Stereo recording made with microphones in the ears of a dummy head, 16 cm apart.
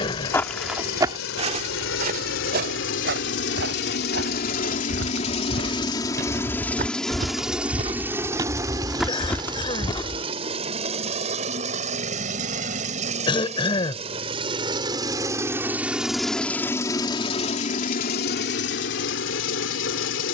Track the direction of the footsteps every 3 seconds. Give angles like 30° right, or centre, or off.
30° right, 70° right, 40° right, 20° left, off, off, off.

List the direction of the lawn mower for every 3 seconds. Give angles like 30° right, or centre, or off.
70° left, 50° left, centre, 30° right, 40° right, 10° left, 60° left.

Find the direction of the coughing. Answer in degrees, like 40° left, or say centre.
30° left.